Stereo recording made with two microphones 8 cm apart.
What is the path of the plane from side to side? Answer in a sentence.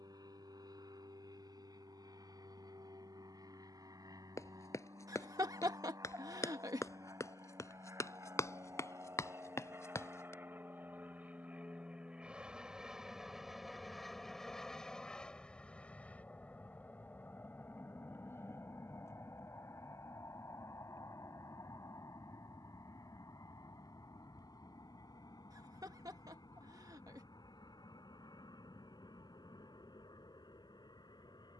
You can hear the plane move to the left.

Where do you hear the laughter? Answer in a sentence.
In this clip you hear the laughter on the right.